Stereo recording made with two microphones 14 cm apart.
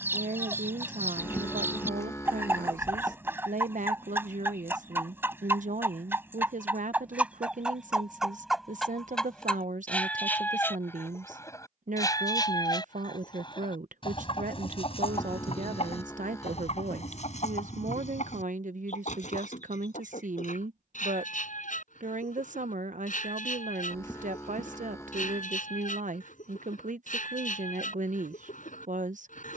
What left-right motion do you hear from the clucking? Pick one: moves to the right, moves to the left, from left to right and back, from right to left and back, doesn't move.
moves to the left.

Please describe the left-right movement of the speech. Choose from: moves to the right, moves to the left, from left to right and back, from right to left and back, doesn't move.
doesn't move.